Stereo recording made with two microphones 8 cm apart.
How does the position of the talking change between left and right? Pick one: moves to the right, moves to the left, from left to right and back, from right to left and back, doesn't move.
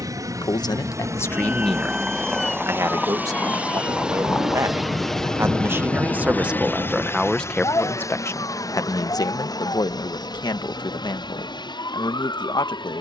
from left to right and back.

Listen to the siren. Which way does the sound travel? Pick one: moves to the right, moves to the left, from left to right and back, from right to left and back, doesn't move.
moves to the left.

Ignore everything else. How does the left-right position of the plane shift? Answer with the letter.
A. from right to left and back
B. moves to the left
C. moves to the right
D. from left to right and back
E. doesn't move
B.